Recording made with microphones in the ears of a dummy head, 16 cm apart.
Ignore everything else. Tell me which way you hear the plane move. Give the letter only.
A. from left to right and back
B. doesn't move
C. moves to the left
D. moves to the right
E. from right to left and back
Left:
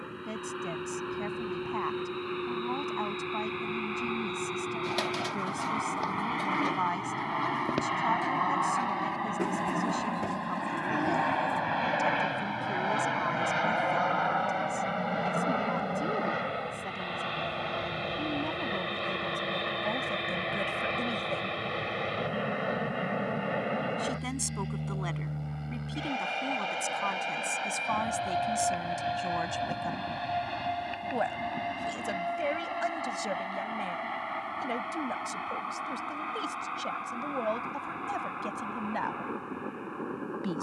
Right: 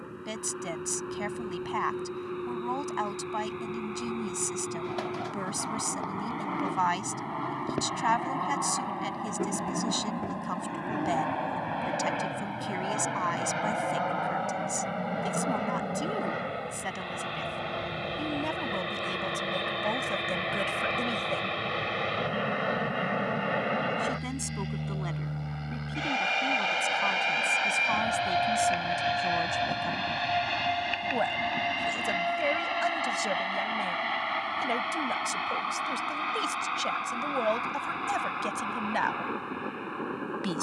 D.